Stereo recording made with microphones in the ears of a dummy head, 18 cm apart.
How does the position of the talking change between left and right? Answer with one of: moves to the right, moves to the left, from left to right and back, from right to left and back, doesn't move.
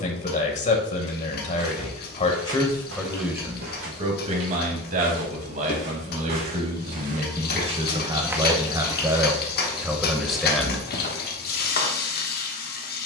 from left to right and back.